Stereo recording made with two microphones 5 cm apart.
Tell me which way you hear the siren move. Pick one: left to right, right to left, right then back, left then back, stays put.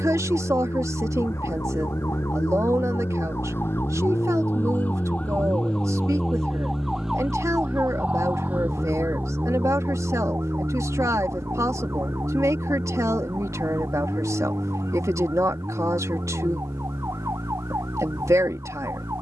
left to right.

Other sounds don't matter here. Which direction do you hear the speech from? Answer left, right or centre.
right.